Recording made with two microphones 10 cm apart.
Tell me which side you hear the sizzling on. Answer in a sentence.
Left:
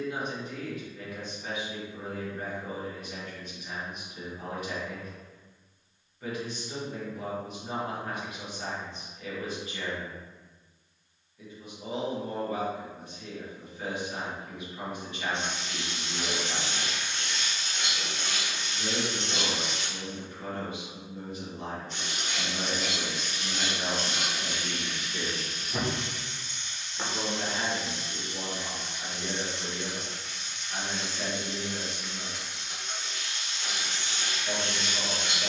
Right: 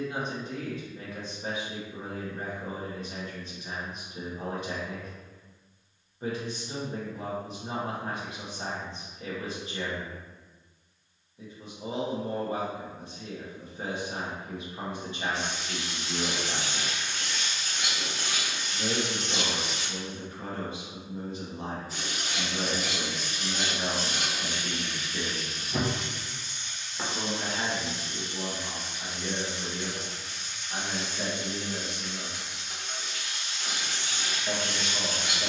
You can hear the sizzling in the centre.